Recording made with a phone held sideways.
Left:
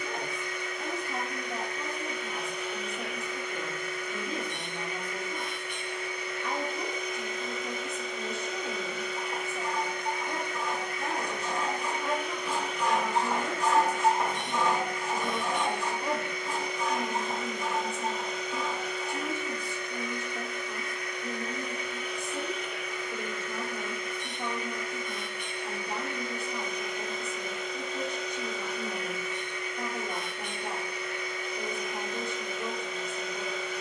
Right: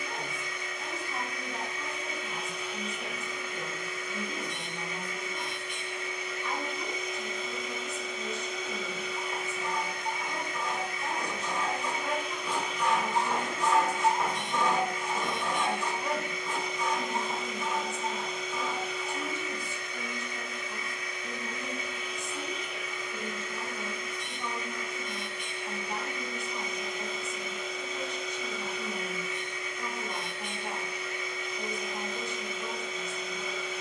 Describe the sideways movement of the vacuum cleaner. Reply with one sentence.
You can hear the vacuum cleaner stay put.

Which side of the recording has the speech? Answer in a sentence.
In this clip you hear the speech on the left.